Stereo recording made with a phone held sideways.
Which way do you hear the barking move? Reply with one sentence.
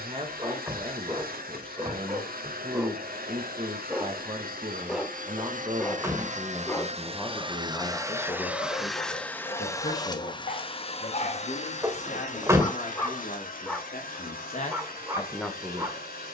In this clip you hear the barking move from right to left and back again.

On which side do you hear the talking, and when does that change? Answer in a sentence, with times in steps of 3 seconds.
You can hear the talking on the right from 0 s, in the centre from 6 s, on the left from 9 s and in the centre from 15 s.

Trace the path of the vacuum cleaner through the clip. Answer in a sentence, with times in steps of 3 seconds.
In this clip you hear the vacuum cleaner on the right from 0 s and on the left from 9 s.